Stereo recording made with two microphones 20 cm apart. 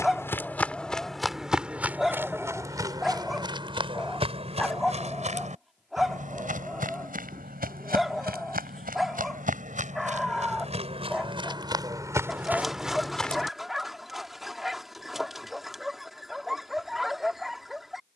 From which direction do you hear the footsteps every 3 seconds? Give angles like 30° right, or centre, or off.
centre, 30° right, 50° right, 30° right, centre, off.